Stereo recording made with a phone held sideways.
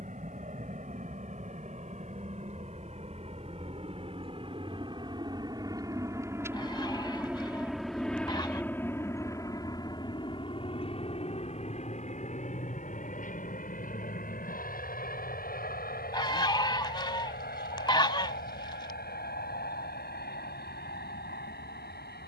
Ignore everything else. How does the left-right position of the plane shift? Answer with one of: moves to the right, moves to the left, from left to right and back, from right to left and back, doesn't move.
moves to the left.